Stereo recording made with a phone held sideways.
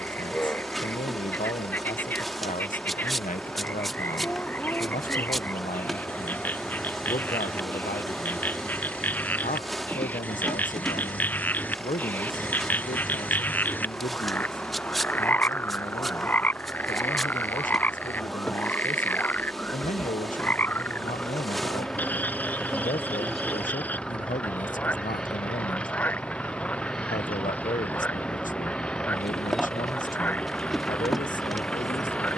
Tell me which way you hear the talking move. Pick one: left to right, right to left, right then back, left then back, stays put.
stays put.